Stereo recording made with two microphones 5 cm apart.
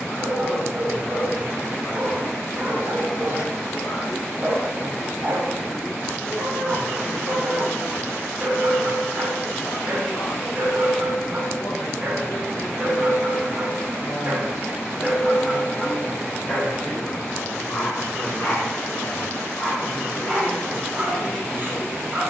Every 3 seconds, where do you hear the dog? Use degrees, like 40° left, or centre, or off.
40° right, 40° right, 40° right, 40° right, 40° right, 10° left, 10° left, 30° right.